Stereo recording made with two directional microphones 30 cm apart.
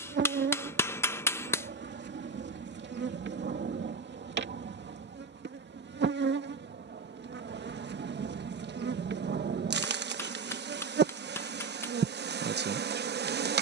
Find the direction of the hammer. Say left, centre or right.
centre.